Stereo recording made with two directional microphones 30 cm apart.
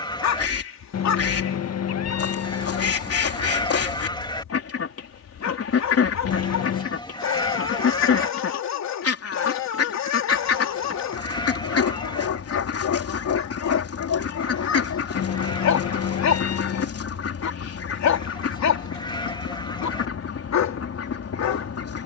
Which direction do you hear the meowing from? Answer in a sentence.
In this clip you hear the meowing on the left.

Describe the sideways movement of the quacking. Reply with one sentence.
In this clip you hear the quacking stay in one place.